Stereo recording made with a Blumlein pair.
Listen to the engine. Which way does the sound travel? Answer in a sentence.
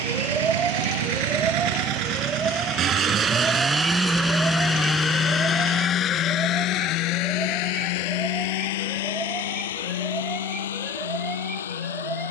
You can hear the engine move from right to left.